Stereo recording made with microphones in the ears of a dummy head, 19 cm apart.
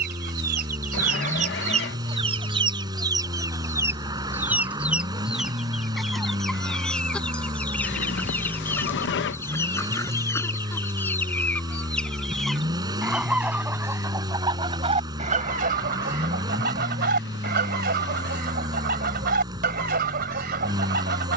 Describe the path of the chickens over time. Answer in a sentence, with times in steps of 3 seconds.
In this clip you hear the chickens on the right from 0 s, in the centre from 3 s and on the right from 15 s.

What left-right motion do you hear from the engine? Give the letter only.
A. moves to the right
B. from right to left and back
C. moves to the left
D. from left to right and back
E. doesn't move
E.